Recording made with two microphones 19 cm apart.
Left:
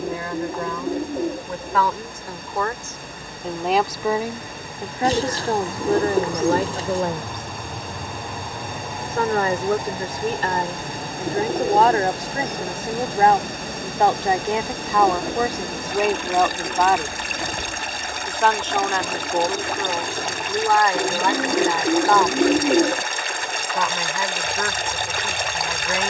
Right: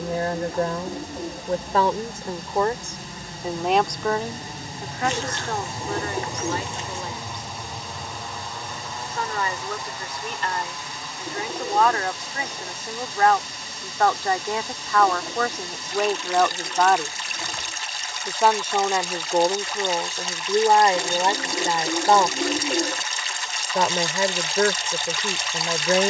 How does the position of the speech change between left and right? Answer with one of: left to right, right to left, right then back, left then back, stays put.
left then back.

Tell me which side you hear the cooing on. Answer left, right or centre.
left.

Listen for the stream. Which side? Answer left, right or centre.
left.